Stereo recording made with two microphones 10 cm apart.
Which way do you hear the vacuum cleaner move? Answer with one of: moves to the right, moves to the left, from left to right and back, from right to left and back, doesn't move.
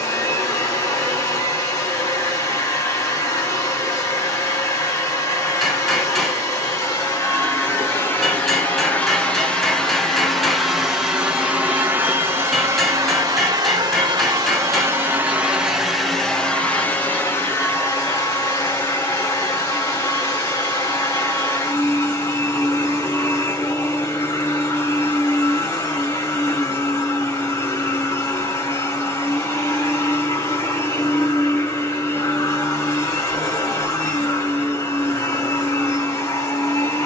from left to right and back.